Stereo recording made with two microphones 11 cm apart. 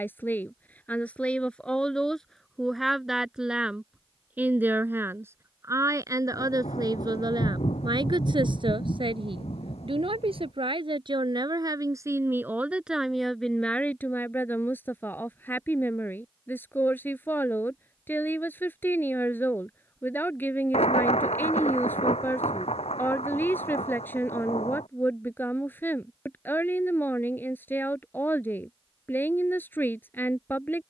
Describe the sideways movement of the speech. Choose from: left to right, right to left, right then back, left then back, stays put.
right then back.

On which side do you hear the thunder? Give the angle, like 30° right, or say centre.
80° left.